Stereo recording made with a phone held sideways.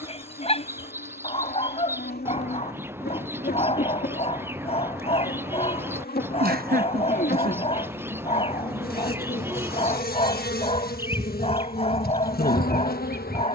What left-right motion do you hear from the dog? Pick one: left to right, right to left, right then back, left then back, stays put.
stays put.